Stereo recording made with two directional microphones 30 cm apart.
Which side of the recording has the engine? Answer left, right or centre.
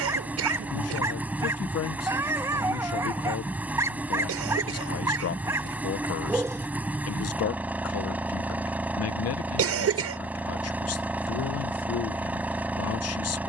centre.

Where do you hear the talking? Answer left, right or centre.
left.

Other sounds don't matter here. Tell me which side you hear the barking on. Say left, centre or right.
centre.